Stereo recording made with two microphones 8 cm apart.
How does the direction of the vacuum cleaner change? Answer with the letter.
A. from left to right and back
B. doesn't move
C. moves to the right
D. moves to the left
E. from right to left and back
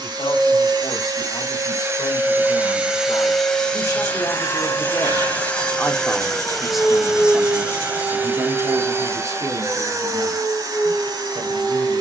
E.